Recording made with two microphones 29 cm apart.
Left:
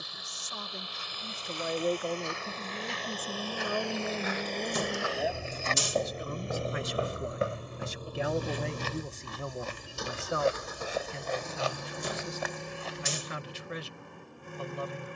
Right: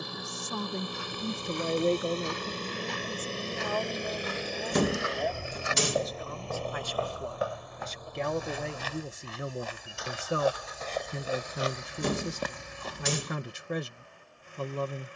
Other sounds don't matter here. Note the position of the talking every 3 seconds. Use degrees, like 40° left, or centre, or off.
40° right, 30° left, 10° left, 30° right, 50° right.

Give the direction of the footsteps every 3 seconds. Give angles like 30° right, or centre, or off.
60° right, 30° right, 30° left, 20° left, 50° right.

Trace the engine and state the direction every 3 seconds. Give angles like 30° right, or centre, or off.
50° right, 10° right, 30° left, 50° left, 60° left.